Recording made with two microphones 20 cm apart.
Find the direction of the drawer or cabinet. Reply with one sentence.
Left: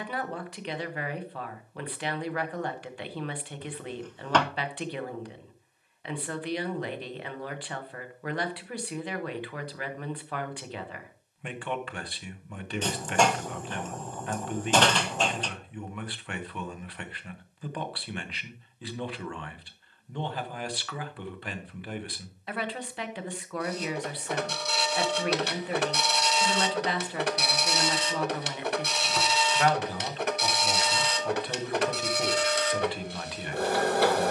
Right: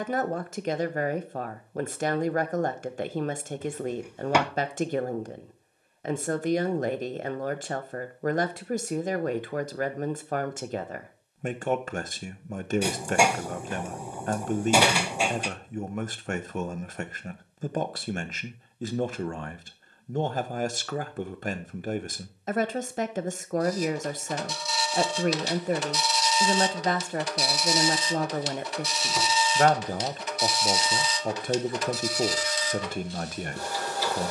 You can hear the drawer or cabinet in the centre.